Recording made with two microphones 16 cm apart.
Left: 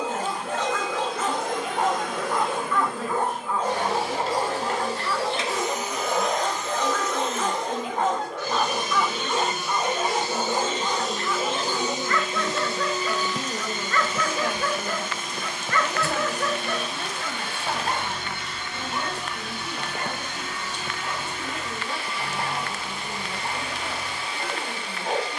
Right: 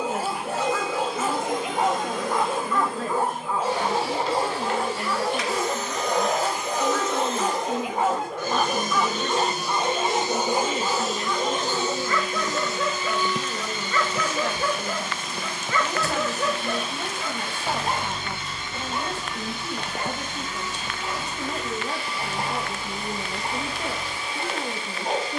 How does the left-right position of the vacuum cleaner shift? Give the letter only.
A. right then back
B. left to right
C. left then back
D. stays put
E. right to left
A.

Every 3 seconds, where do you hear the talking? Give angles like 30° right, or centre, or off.
50° right, 50° right, 50° right, 30° right, 10° left, 10° right, 30° right, 40° right, 50° right.